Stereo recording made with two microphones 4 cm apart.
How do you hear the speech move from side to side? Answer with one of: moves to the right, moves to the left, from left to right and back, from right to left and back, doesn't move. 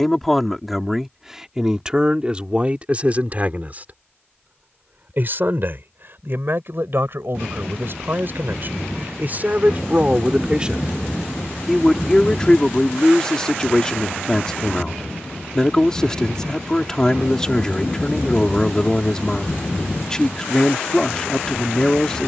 from left to right and back.